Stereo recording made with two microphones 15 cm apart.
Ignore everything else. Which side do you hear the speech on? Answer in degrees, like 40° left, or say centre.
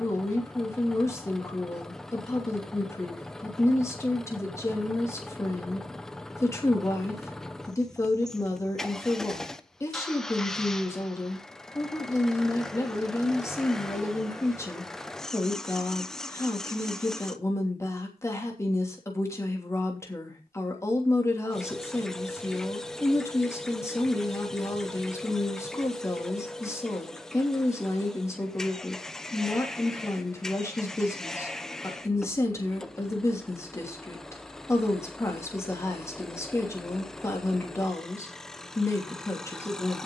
20° left.